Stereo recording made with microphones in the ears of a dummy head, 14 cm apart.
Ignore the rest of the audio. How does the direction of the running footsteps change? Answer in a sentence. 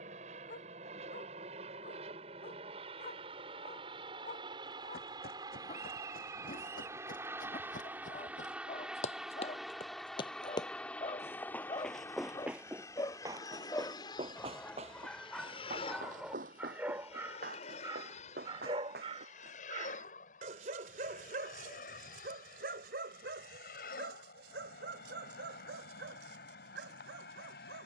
In this clip you hear the running footsteps move from left to right.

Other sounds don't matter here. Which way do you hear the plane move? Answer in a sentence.
You can hear the plane move to the left.